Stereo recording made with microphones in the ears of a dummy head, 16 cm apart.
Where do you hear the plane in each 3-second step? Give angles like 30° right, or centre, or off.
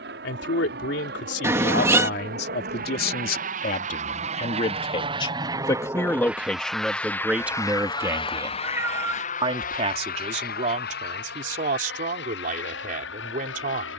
60° right, 40° right, 10° left, 50° left, 60° left.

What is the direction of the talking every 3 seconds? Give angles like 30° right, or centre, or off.
60° left, 30° left, 10° right, 40° right, 50° right.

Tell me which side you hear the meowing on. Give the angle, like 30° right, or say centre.
10° right.